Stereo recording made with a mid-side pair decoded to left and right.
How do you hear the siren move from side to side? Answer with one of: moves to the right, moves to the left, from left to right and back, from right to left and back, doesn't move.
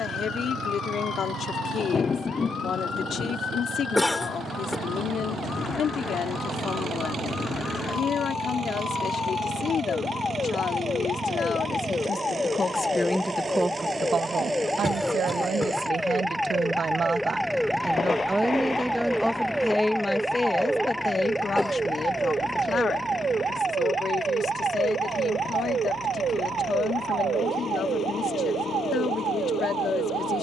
moves to the right.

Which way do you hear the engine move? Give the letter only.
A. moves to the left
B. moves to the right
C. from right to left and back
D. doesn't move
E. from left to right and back
A.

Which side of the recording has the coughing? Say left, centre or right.
centre.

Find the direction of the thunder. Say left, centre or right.
left.